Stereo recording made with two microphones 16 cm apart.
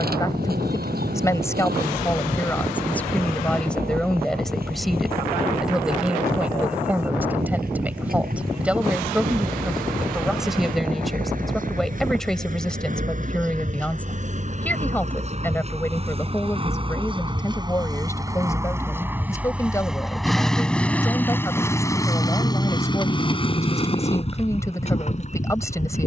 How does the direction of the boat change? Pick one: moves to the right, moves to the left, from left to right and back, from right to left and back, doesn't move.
moves to the left.